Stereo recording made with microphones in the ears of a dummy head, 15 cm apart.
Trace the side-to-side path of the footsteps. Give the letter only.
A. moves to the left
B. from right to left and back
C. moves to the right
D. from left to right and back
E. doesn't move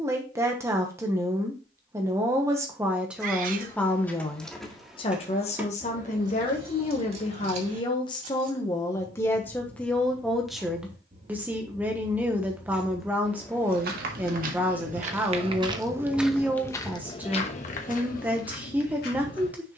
A.